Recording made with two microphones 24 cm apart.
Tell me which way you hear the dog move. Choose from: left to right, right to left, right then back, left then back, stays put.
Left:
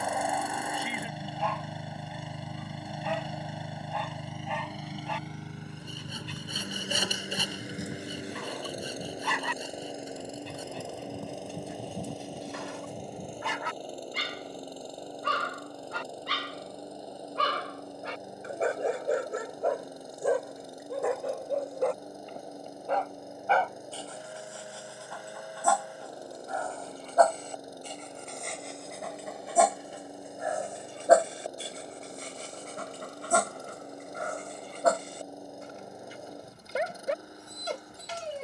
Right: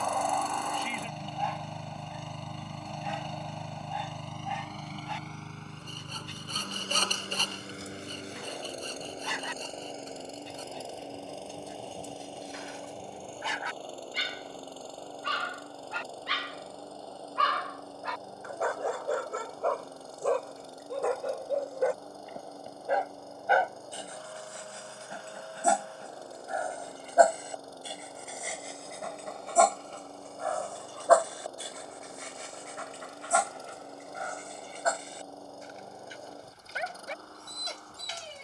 right then back.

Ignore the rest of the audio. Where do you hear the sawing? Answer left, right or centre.
centre.